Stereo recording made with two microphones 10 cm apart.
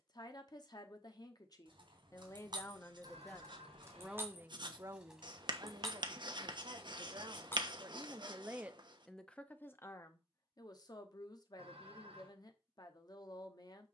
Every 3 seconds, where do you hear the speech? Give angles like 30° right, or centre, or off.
40° left, 20° right, 40° right, 30° left, 40° left.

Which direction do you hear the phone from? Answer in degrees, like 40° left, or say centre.
70° right.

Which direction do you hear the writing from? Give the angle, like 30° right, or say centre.
50° right.